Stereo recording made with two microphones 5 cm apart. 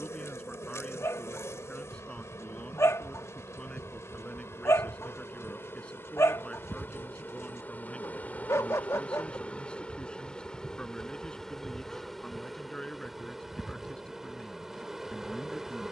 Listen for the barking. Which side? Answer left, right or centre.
left.